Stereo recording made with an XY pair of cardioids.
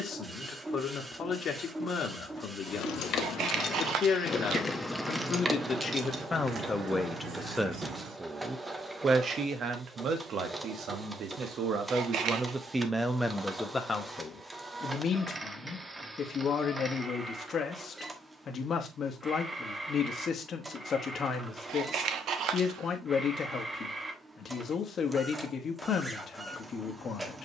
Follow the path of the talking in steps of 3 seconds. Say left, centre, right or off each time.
left, left, centre, right, centre, left, left, left, left.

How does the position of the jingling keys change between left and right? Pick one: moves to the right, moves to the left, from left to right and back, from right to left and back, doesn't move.
moves to the right.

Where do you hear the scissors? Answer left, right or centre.
right.